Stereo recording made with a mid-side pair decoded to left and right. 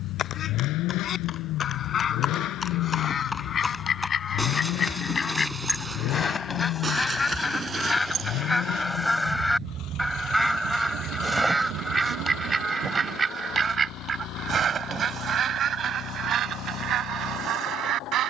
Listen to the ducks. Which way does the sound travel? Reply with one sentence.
In this clip you hear the ducks go from the left side to the right.